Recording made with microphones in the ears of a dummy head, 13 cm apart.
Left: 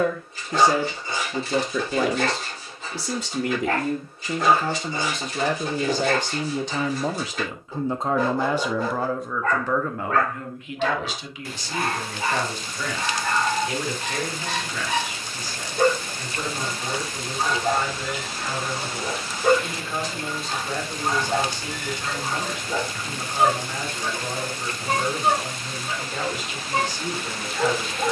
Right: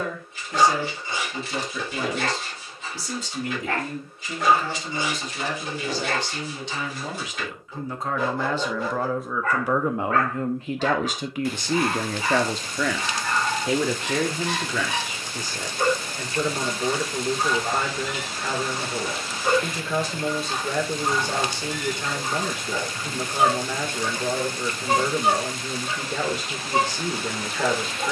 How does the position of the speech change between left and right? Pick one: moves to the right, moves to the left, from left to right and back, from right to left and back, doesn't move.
moves to the right.